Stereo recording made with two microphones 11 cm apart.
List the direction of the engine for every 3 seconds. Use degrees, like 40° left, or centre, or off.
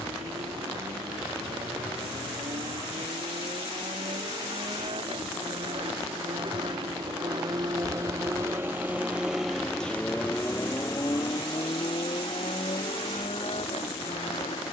70° right, 60° right, 40° right, 20° left, 60° left.